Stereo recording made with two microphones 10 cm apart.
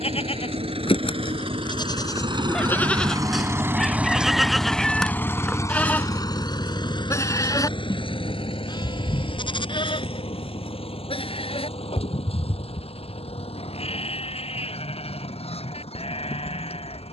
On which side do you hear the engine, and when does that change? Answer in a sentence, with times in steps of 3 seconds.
In this clip you hear the engine on the right from 0 s, in the centre from 3 s and on the left from 6 s.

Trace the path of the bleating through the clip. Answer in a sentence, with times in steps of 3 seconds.
In this clip you hear the bleating on the left from 0 s, in the centre from 3 s and on the left from 6 s.